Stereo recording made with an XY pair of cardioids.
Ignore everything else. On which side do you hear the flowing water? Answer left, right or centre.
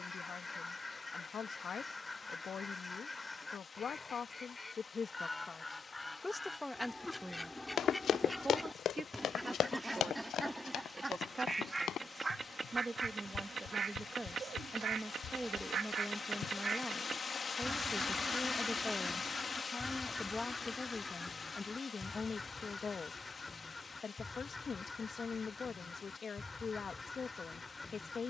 left.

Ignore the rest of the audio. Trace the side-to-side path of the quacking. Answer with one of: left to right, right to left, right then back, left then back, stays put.
right then back.